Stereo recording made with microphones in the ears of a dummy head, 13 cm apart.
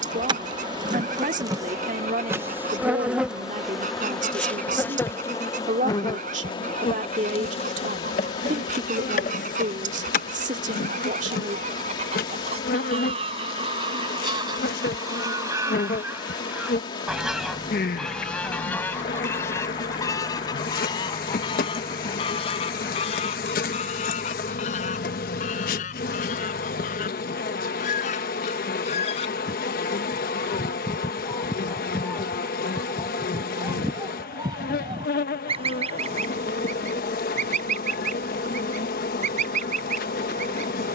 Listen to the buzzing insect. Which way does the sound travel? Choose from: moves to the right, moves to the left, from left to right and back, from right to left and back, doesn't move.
moves to the left.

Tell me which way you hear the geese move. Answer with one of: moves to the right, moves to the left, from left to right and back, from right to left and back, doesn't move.
from right to left and back.